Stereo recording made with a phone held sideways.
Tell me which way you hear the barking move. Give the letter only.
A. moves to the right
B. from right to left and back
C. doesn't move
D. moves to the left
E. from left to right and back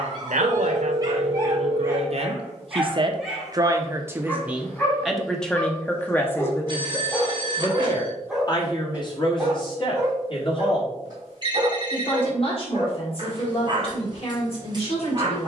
B.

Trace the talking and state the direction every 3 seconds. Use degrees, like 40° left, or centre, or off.
60° right, 10° right, 30° left, 40° left, 50° left.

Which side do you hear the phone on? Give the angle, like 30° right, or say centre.
40° right.